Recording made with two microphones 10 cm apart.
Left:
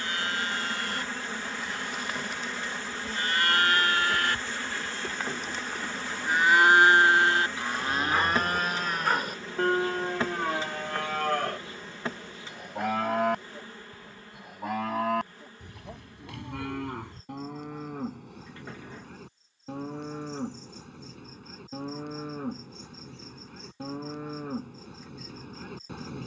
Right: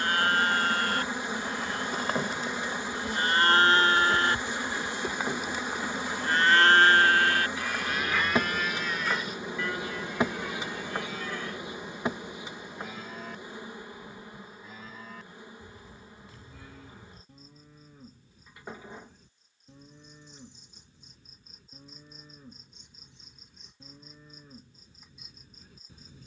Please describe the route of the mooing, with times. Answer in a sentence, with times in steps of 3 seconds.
You can hear the mooing on the right from 0 s and on the left from 6 s.